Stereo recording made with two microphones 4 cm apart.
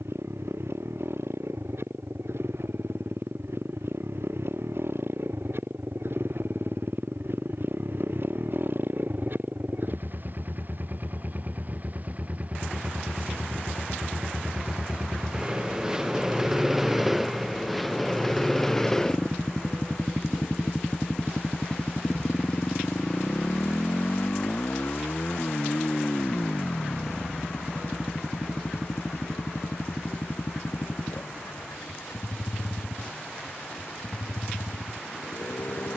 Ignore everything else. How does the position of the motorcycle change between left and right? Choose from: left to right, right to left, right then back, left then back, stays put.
right to left.